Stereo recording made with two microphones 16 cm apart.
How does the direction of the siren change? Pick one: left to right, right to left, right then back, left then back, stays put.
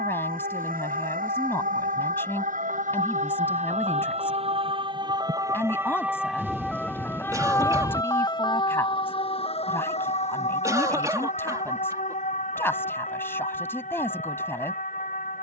right to left.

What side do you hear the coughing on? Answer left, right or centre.
right.